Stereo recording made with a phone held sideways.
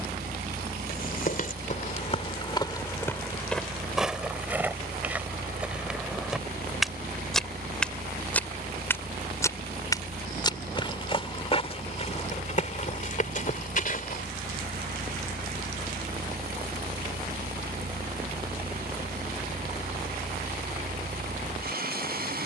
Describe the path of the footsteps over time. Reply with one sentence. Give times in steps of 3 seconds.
In this clip you hear the footsteps on the left from 0 s, in the centre from 3 s, on the left from 9 s and not at all from 15 s.